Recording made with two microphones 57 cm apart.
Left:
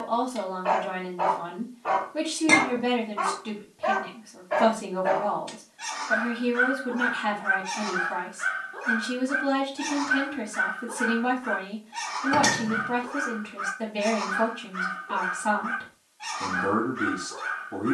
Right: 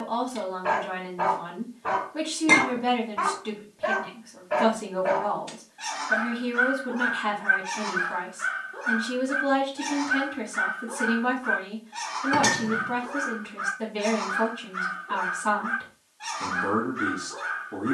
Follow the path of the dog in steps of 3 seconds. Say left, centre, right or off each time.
right, right, centre, left, left, left.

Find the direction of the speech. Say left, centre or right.
centre.